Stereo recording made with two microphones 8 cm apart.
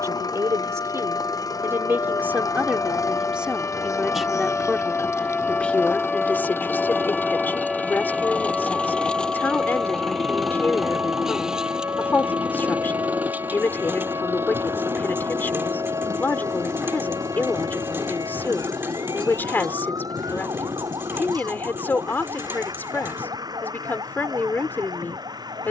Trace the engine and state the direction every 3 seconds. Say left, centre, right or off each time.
left, left, left, centre, right, right, right, right, right.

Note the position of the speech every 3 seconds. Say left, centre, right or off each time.
right, centre, left, left, left, left, left, left, left.